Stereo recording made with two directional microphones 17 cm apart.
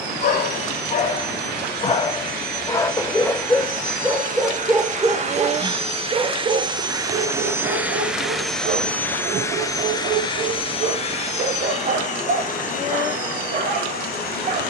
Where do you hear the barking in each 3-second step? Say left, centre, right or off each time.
left, centre, right, right, right.